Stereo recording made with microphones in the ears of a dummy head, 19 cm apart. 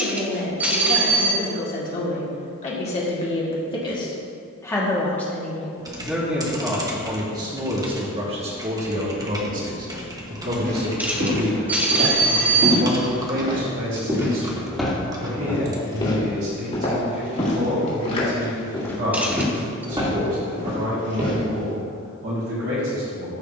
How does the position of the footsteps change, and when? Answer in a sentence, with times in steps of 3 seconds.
You can hear the footsteps not at all from 0 s, on the right from 9 s, on the left from 15 s, in the centre from 18 s and on the right from 21 s.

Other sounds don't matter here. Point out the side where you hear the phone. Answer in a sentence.
In this clip you hear the phone in the centre.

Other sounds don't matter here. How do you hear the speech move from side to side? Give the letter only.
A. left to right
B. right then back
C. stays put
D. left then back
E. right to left
A.